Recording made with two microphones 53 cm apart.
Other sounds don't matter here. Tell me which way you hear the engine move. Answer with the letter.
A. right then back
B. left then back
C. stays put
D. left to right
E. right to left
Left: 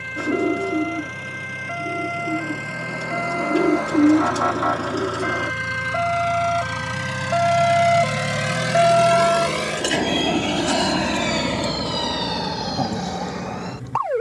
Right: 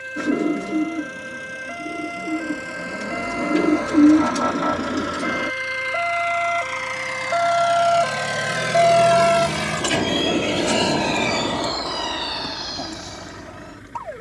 D.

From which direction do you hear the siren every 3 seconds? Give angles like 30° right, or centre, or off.
60° right, 60° right, 40° right, 20° left, 70° left.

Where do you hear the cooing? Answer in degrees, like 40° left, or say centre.
40° right.